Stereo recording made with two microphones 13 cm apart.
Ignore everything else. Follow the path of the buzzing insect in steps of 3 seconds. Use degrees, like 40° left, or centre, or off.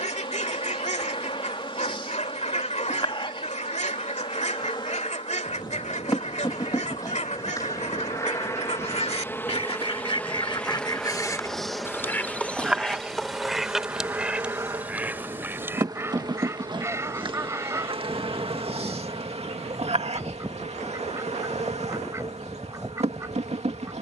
40° left, 40° left, 30° left, 10° left, 10° right, 40° right, 50° right, 60° right.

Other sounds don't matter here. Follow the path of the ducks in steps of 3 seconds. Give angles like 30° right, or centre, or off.
60° left, 60° left, 60° left, 40° left, centre, 20° right, 20° right, 20° right.